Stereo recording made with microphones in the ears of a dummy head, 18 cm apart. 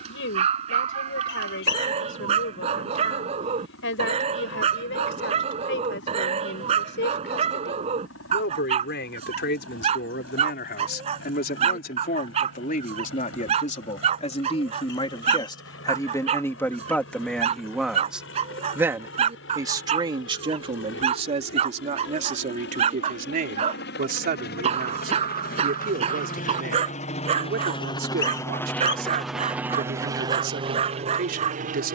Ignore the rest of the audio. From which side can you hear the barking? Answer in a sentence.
You can hear the barking on the right.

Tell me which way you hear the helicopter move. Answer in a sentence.
You can hear the helicopter move from left to right.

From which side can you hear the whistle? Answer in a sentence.
You can hear the whistle on the left.